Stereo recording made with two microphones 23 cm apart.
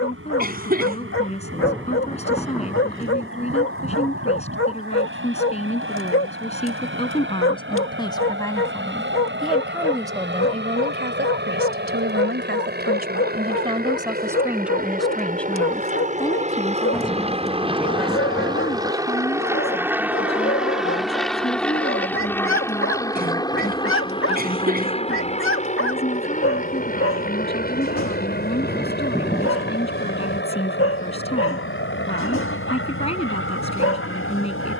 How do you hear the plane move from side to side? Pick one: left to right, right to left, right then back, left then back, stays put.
right to left.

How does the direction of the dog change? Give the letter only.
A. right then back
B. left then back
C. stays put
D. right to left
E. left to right
C.